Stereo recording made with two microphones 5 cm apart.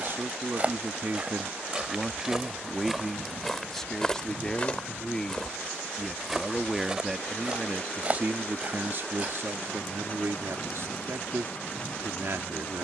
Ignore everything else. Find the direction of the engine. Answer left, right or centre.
left.